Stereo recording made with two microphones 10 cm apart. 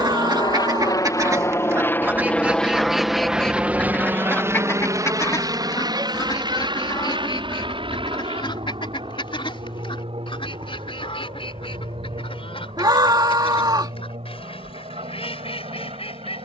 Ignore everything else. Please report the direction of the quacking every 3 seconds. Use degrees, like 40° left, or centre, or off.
30° right, 20° left, 50° left, 60° left, 60° left, 70° left.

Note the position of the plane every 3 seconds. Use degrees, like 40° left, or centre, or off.
30° left, 20° right, 50° right, 60° right, 60° right, 60° right.